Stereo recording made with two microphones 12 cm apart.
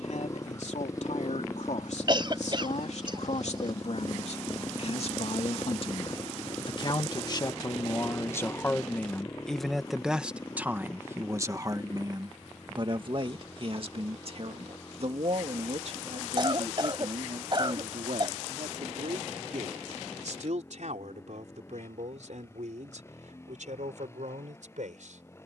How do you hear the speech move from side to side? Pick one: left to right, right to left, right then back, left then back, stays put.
left to right.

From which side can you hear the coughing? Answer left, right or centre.
right.